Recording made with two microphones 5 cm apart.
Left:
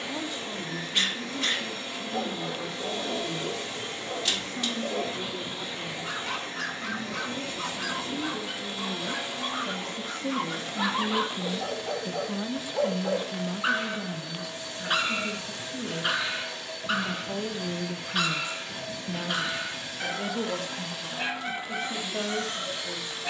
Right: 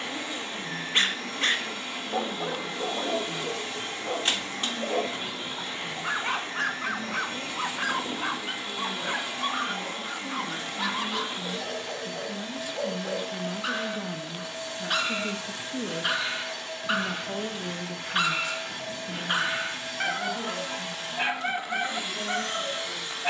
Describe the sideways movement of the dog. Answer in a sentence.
You can hear the dog go left and come back.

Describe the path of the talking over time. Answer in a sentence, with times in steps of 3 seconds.
You can hear the talking on the left from 0 s, in the centre from 12 s, on the right from 15 s and on the left from 18 s.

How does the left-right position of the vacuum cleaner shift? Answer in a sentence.
In this clip you hear the vacuum cleaner stay put.